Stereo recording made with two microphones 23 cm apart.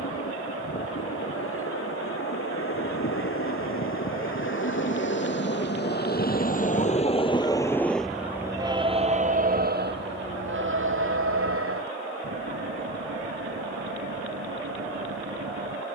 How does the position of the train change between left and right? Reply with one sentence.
You can hear the train travel towards the right.